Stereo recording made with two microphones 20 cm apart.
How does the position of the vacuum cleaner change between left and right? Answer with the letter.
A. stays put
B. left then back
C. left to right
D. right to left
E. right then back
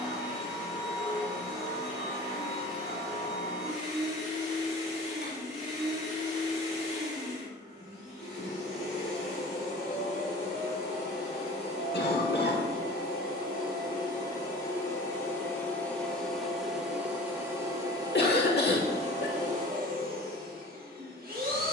C.